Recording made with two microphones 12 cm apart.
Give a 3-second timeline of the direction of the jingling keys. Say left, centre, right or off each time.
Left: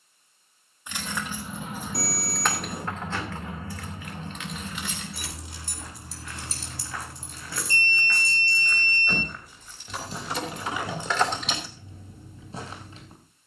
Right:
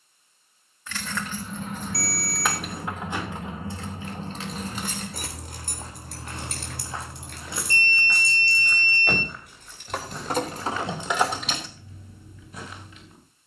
centre, right, right, right, off.